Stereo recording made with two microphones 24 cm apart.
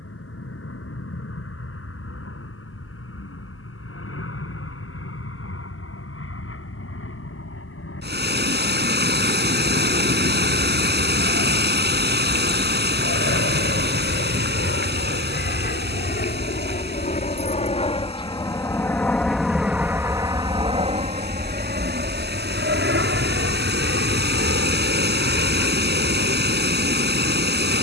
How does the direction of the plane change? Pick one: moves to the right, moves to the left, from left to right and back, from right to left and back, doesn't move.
moves to the right.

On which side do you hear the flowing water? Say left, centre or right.
right.